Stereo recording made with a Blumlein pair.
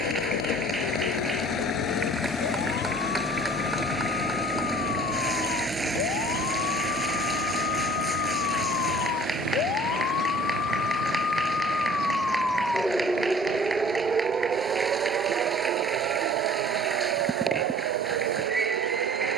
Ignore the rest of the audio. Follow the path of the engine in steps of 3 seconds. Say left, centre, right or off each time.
left, centre, right, right, right, right, right.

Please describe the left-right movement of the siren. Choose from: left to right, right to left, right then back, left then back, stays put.
left to right.